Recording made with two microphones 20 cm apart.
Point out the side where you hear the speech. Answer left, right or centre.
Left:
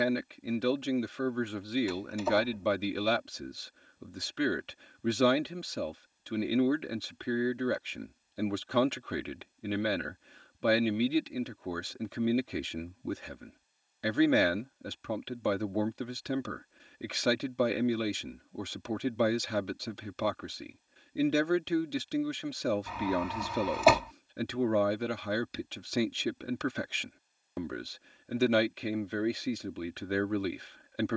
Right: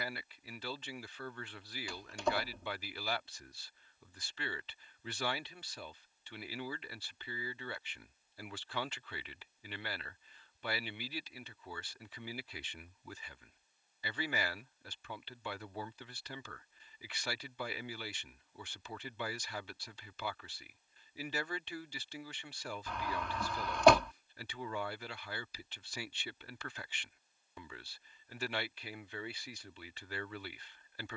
left.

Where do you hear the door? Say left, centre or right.
centre.